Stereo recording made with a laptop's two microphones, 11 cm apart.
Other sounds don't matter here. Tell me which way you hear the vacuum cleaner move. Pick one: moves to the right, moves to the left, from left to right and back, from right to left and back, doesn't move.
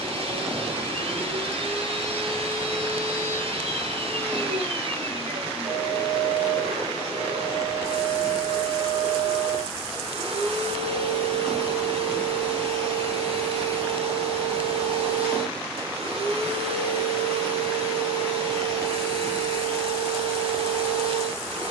doesn't move.